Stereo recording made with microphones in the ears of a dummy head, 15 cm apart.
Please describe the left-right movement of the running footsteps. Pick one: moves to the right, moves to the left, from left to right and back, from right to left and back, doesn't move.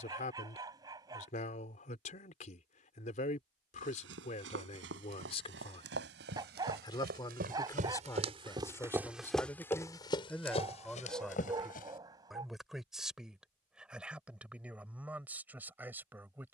moves to the left.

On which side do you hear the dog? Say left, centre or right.
right.